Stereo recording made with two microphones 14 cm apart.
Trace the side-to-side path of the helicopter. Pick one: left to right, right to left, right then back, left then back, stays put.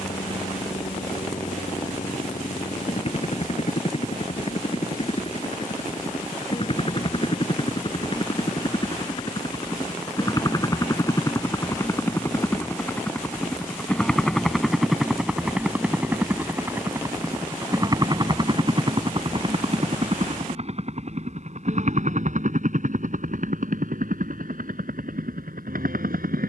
left to right.